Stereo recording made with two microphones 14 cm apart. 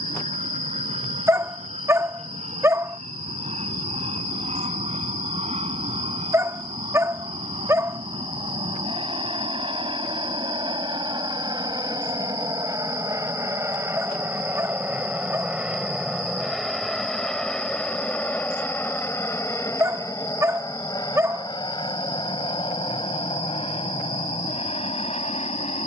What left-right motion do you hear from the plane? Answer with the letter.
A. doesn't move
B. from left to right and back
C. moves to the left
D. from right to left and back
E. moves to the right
C.